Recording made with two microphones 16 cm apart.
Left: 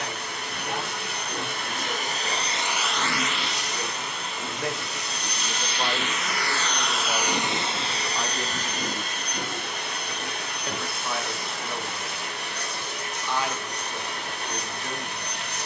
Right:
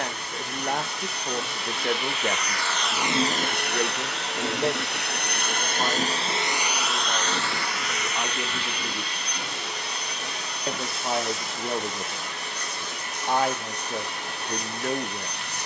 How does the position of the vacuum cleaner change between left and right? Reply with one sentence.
You can hear the vacuum cleaner go right and come back.